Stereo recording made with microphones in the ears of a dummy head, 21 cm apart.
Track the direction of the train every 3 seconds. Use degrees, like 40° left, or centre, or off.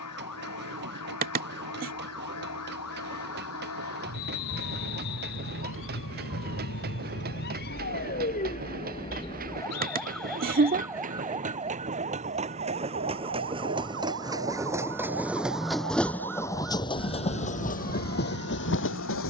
50° right, 50° right, 40° right, 40° right, 20° right, 10° left, 50° left.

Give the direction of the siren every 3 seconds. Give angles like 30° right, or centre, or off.
80° left, 70° left, 50° left, centre, 50° right, 60° right, 70° right.